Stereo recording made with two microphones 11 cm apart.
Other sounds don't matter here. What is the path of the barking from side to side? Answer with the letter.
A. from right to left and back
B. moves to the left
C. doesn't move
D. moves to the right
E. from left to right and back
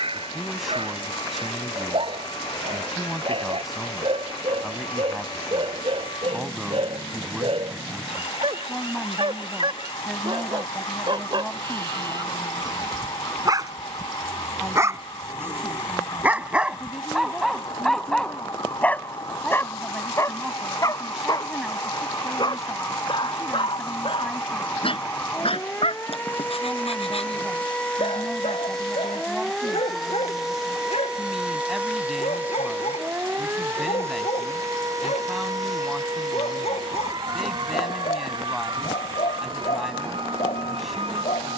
B.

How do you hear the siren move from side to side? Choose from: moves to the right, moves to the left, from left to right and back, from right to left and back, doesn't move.
moves to the right.